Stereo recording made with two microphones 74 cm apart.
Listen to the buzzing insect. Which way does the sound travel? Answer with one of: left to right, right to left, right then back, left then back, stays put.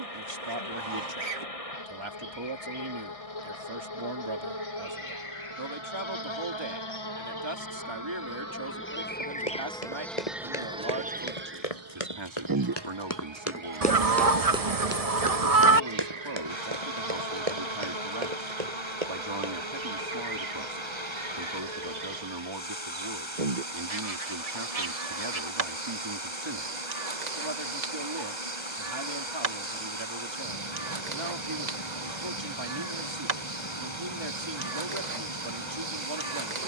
left to right.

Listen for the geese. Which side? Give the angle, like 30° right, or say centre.
50° right.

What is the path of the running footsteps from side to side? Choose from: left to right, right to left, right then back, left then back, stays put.
left to right.